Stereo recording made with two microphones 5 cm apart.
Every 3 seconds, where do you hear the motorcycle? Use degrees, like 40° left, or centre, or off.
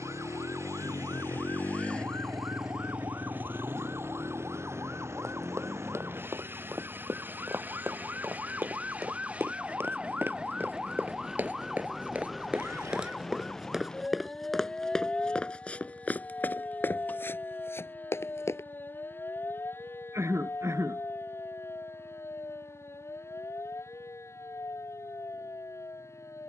30° left, 50° right, 70° right, 80° right, 80° right, 80° right, 80° right, 80° right, 80° right.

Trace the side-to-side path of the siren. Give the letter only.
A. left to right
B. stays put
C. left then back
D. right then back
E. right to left
E.